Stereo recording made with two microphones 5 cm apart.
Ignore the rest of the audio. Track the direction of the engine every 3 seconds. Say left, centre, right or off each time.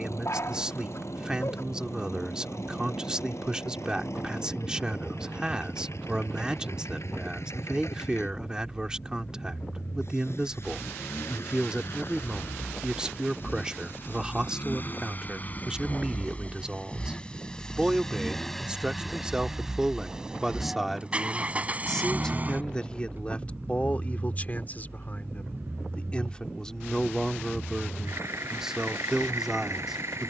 left, left, left, left, left, left, centre, right, right, right.